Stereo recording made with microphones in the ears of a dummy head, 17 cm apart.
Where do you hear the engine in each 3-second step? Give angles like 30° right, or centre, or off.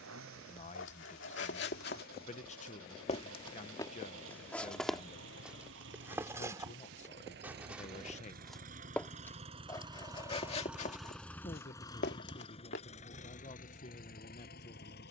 80° right, 70° right, 60° right, 10° right, 40° left.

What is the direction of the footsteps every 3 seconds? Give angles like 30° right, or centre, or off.
60° left, 10° left, 10° right, 30° left, 60° left.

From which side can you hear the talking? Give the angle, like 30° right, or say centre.
40° left.